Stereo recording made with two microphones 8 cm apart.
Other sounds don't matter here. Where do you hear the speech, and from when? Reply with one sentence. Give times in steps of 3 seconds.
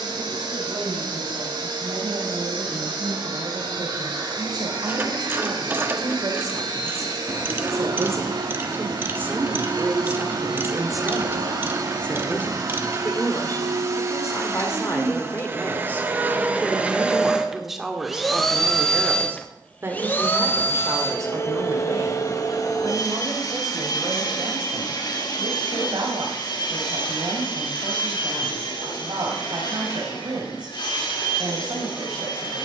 You can hear the speech on the right from 0 s, in the centre from 9 s, on the left from 12 s, in the centre from 15 s and on the right from 18 s.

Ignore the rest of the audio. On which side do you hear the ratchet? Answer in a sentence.
In this clip you hear the ratchet on the right.